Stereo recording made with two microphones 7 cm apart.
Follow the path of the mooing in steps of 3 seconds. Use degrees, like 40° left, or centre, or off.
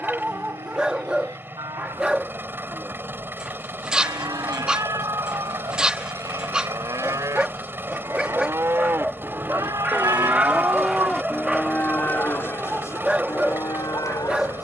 70° right, 60° right, 50° right, centre, 50° left.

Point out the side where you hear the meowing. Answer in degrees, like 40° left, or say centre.
50° right.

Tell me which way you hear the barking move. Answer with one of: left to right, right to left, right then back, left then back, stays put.
stays put.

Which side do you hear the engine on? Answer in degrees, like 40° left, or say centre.
30° right.